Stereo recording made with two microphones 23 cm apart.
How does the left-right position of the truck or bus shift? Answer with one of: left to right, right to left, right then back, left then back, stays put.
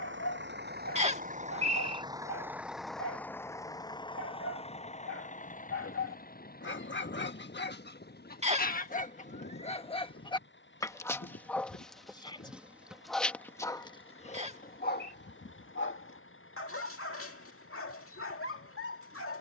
right to left.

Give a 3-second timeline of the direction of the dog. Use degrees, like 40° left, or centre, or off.
80° left, 70° left, 50° left, 20° left, 20° left, 70° left, 70° left.